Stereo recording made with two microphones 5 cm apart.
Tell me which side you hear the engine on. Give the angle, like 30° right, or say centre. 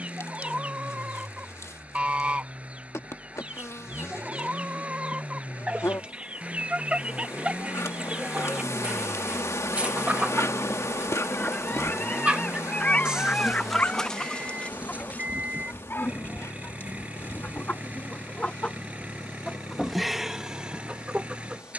30° right.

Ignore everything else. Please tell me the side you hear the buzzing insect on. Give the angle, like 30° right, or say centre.
70° left.